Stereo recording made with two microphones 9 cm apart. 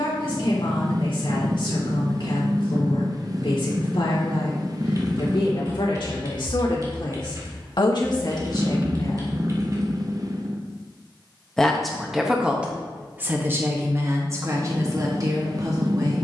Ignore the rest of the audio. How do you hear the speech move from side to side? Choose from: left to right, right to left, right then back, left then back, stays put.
left to right.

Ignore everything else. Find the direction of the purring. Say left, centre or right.
right.